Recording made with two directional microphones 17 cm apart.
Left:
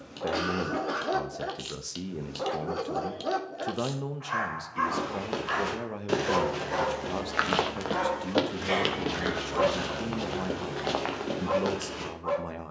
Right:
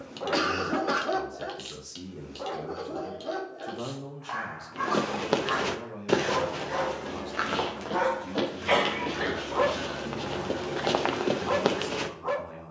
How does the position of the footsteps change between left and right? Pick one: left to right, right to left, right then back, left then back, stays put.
left then back.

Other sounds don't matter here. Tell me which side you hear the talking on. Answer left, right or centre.
left.